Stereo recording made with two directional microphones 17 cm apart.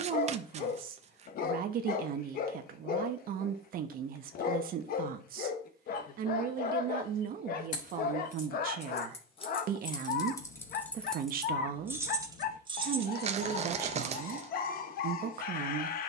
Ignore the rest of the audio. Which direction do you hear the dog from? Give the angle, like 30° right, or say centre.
60° left.